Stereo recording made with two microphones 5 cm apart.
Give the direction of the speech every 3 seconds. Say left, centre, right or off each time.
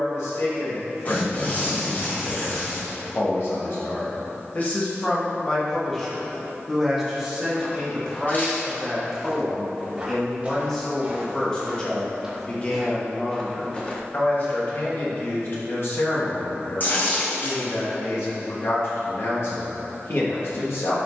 left, left, centre, centre, left, left, left.